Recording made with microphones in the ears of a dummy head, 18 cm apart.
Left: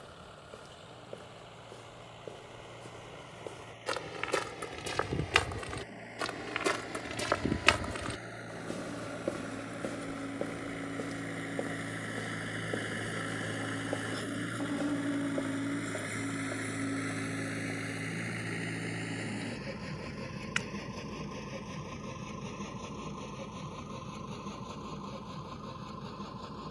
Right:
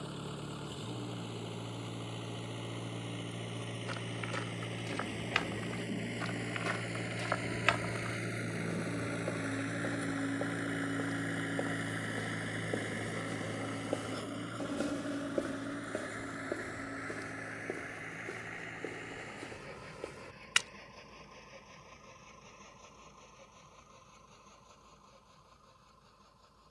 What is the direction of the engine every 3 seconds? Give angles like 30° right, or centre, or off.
50° right, 50° right, 30° right, 20° right, 10° left, 40° left, 50° left, 60° left, 70° left.